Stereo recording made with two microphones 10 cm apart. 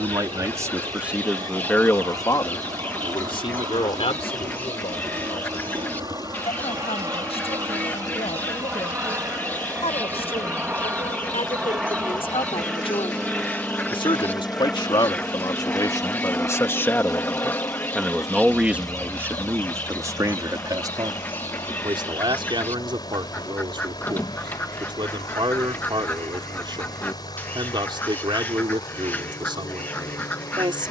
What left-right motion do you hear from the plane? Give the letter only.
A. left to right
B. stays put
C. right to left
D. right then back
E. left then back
C.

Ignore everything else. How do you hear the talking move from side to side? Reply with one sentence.
You can hear the talking move from right to left and back again.